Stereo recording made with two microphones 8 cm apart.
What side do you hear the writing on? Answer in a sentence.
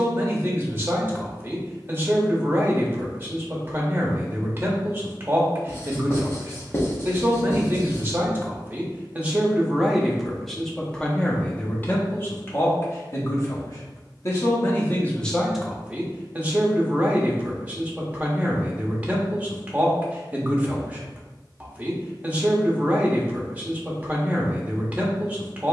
In this clip you hear the writing on the left.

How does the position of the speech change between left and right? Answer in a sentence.
You can hear the speech move from right to left and back again.